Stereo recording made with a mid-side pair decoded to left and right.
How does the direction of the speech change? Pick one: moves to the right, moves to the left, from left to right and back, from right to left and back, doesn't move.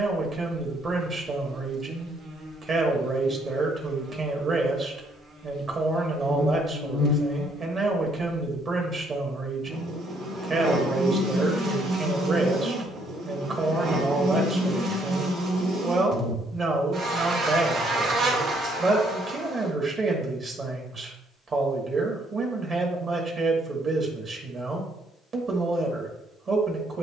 doesn't move.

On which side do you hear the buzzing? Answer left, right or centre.
right.